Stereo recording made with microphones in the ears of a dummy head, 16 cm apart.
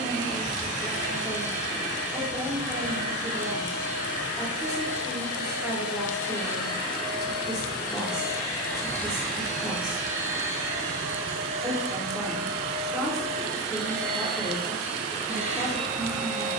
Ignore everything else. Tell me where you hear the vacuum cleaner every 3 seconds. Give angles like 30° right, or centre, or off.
40° right, 30° right, 20° left, 20° right, 40° right, 40° right.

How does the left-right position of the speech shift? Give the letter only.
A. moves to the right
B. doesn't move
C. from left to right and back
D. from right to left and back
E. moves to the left
B.